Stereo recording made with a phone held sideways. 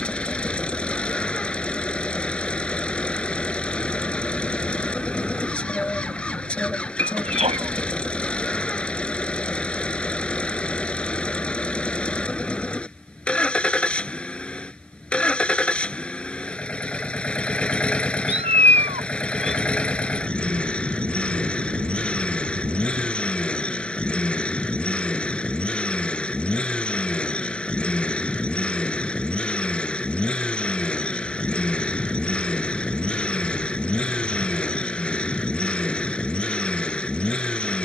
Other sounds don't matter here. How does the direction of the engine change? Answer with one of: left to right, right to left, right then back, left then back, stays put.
stays put.